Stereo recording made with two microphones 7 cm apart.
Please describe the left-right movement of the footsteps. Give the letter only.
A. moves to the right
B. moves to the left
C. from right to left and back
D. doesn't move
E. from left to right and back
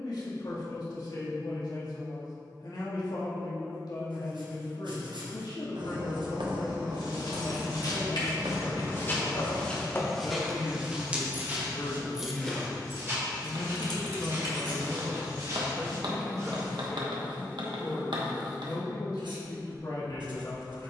A.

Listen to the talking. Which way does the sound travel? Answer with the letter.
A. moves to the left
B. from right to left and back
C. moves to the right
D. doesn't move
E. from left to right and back
E.